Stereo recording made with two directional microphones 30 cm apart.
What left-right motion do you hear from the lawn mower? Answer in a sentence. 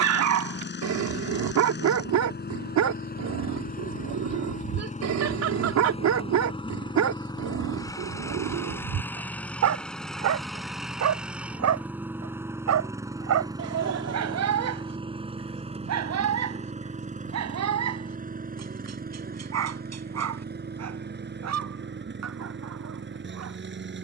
In this clip you hear the lawn mower travel towards the right.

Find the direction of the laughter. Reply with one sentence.
You can hear the laughter on the right.